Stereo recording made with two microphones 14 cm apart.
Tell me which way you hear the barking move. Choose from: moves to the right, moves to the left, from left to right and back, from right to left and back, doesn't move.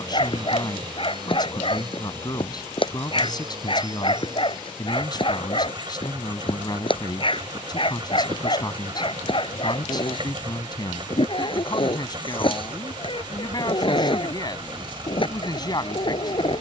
doesn't move.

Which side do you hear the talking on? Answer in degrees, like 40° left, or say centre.
30° left.